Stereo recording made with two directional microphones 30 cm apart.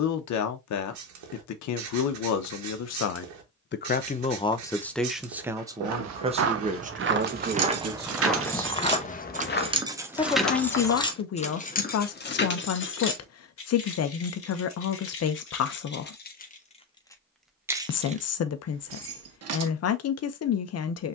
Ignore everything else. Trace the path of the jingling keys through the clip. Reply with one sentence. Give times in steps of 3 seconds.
In this clip you hear the jingling keys not at all from 0 s, on the right from 6 s, in the centre from 9 s, on the left from 12 s and on the right from 18 s.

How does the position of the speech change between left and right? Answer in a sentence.
In this clip you hear the speech move from left to right and back again.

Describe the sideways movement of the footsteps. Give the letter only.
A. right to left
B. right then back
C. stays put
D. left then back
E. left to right
A.